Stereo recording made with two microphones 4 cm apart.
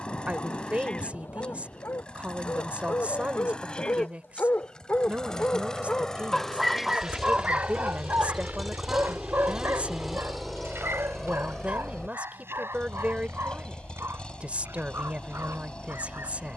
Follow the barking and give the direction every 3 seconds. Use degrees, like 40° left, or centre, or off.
70° left, 50° left, 30° right, 70° right, 80° right, 80° right.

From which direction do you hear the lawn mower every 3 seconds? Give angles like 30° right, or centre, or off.
20° left, 20° left, 10° left, centre, 20° left, 20° left.